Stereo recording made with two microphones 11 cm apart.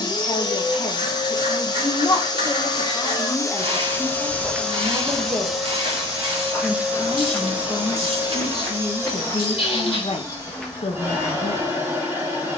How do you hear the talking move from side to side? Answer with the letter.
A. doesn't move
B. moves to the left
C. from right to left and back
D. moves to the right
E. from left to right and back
E.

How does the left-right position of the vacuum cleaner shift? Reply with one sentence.
You can hear the vacuum cleaner move to the right.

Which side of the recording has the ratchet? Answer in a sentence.
You can hear the ratchet on the right.